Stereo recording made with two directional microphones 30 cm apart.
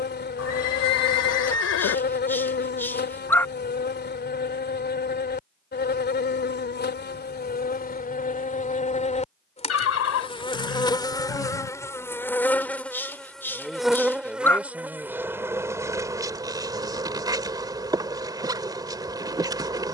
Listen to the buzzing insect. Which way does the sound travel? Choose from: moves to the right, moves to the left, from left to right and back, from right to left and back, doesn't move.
moves to the right.